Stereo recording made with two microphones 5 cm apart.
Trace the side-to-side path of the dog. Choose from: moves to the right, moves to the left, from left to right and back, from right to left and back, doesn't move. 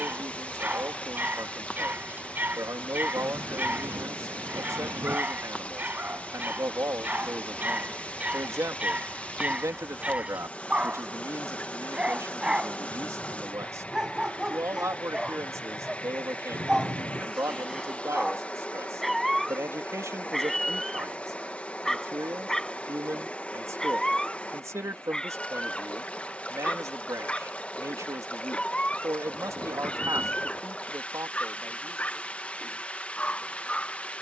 moves to the left.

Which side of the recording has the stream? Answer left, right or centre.
left.